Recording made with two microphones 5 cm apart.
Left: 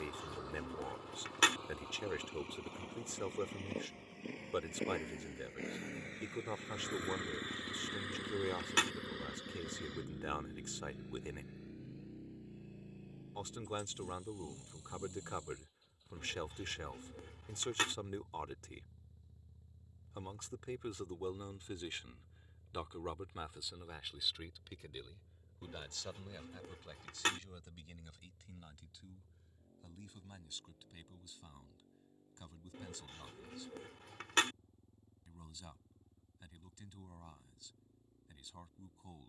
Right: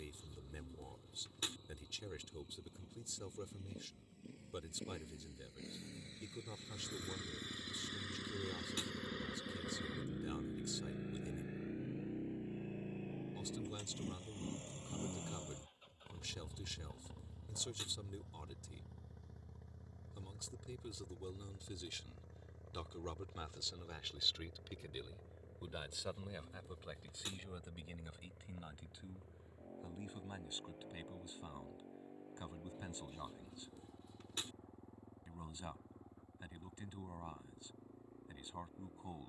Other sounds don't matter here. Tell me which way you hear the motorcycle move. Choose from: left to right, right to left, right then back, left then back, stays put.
left to right.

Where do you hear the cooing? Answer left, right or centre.
left.